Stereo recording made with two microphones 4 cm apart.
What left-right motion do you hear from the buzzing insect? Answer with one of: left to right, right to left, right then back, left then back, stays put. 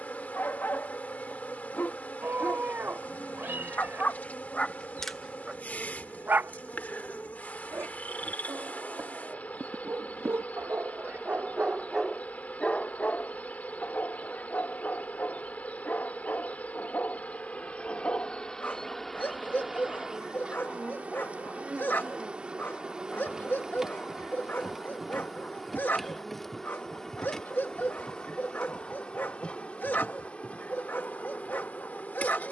right then back.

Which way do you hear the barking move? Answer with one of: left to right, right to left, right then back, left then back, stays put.
right then back.